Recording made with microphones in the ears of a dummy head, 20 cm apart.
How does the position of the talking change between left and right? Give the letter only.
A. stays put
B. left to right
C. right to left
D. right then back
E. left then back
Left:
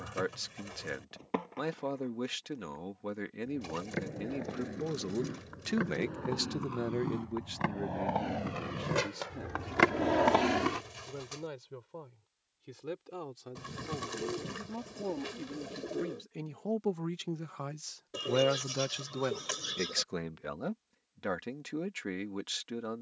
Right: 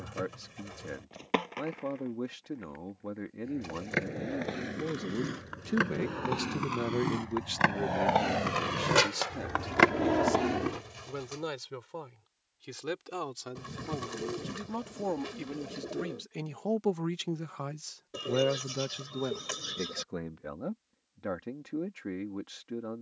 D.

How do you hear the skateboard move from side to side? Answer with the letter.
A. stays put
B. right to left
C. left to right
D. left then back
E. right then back
B.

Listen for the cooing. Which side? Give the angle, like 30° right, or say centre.
20° left.